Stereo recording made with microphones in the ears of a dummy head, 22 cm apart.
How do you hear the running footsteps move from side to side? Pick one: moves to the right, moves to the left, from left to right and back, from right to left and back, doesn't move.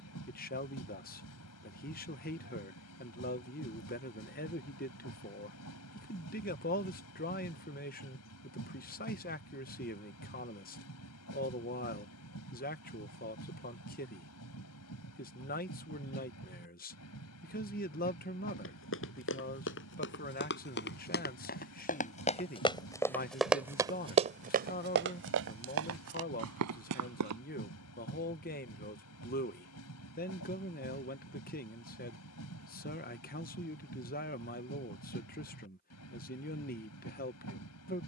moves to the right.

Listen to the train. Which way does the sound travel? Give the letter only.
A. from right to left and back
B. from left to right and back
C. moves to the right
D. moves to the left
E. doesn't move
E.